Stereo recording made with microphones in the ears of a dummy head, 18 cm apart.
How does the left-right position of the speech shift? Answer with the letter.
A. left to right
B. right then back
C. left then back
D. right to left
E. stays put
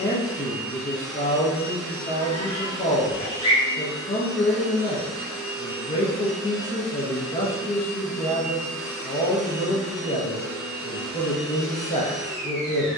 E.